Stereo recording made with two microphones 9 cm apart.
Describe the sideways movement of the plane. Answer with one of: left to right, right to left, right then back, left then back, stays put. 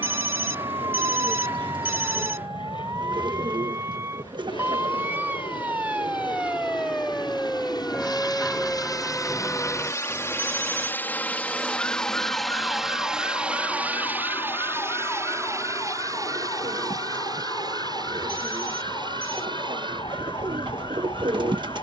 left to right.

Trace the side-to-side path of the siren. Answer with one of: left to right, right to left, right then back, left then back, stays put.
right to left.